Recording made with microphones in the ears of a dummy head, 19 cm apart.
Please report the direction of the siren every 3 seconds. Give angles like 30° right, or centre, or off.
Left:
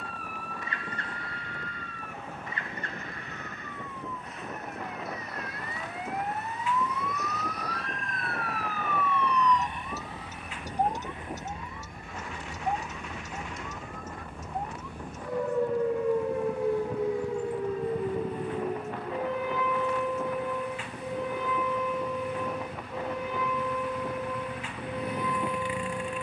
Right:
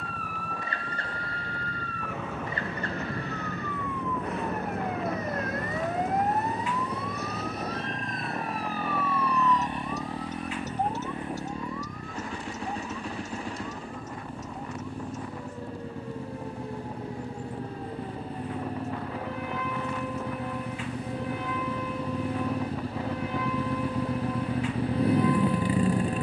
60° right, 50° right, 20° right, 10° left, 40° left, 50° left, 60° left, 70° left, 70° left.